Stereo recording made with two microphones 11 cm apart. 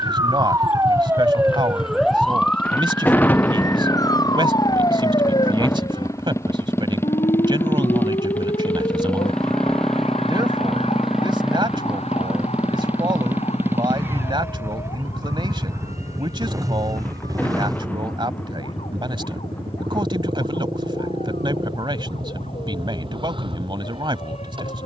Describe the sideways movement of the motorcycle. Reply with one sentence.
In this clip you hear the motorcycle travel towards the right.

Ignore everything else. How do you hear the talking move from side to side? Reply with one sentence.
You can hear the talking stay put.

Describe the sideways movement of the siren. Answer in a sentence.
In this clip you hear the siren move to the left.